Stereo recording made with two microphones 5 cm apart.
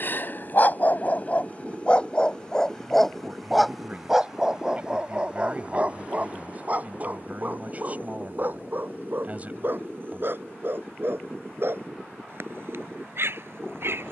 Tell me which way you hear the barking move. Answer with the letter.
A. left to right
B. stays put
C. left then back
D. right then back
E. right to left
A.